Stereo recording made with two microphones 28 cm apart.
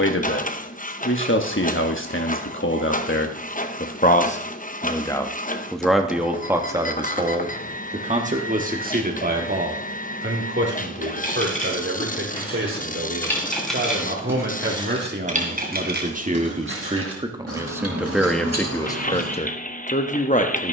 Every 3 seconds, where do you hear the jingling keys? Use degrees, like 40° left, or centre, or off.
off, off, off, 30° left, centre, 40° right, 70° right.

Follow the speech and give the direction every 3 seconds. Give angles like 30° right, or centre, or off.
50° left, 20° left, 20° right, 40° right, 40° right, 20° right, 20° left.